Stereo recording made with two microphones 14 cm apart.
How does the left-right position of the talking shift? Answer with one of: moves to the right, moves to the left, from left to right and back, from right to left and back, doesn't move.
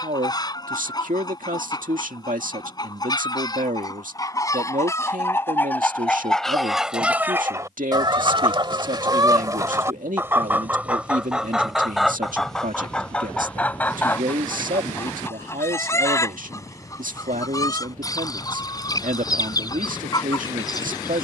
doesn't move.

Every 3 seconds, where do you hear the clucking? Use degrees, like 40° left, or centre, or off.
30° left, 20° left, 20° right, 10° right, 10° left, 20° left, 30° left.